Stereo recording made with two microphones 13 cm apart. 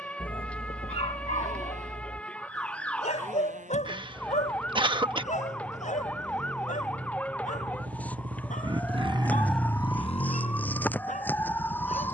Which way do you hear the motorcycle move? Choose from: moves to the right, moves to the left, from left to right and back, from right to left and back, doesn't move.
moves to the left.